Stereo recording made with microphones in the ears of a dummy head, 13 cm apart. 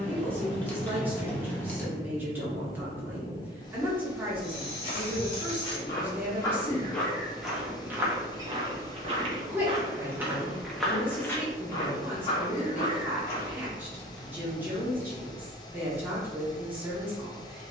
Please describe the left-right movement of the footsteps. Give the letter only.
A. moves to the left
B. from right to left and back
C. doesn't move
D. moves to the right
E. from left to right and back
E.